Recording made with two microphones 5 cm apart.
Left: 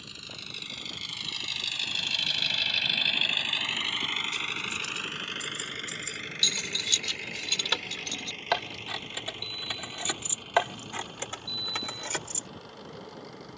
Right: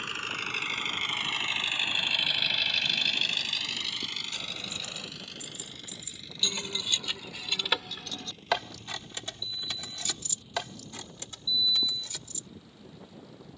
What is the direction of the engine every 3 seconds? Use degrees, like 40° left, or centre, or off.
30° right, 40° left, 70° left, 70° left, 80° left.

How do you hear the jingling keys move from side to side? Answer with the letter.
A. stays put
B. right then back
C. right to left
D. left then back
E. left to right
C.